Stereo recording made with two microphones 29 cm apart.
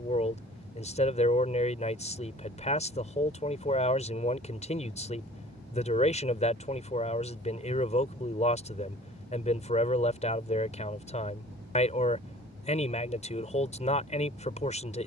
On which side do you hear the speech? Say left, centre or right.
left.